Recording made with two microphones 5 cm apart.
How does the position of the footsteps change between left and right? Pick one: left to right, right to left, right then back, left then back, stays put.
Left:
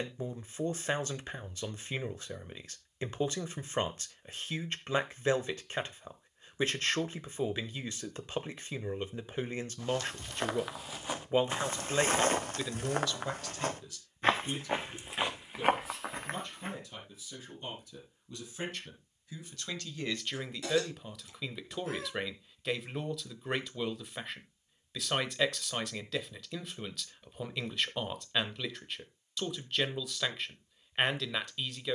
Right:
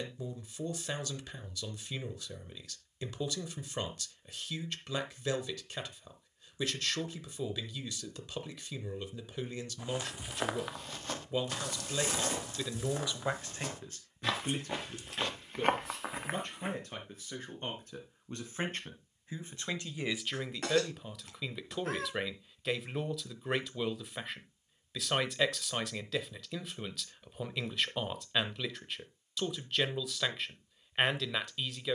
left then back.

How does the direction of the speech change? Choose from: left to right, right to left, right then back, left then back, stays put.
right then back.